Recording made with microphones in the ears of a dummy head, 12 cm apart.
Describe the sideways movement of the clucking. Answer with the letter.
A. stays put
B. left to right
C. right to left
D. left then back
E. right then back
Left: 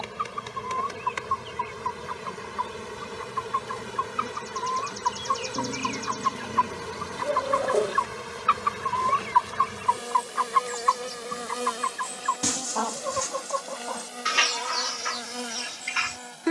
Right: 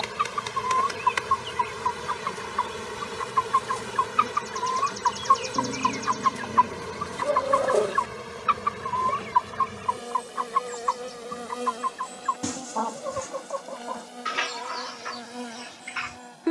C.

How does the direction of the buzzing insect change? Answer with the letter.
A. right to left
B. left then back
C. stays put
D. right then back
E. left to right
A.